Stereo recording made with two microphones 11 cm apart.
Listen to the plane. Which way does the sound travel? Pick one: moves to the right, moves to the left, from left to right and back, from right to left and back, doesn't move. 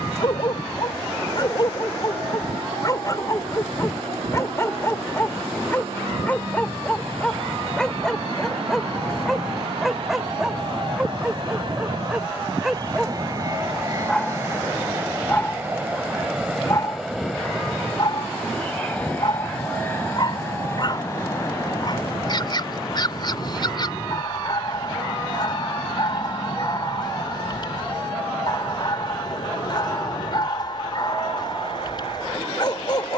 moves to the left.